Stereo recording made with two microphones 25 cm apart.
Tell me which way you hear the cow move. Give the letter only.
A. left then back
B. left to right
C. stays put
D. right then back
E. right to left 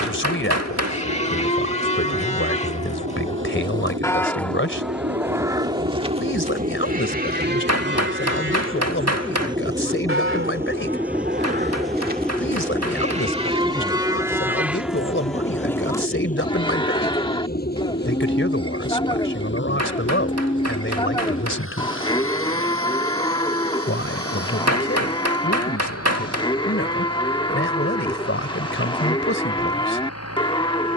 D.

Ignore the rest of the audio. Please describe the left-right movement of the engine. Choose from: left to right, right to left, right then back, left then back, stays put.
right to left.